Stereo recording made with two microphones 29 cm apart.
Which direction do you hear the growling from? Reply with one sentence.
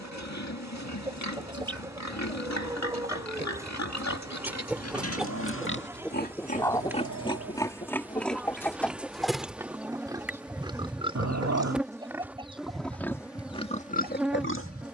In this clip you hear the growling on the right.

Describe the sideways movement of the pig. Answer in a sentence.
You can hear the pig move from left to right and back again.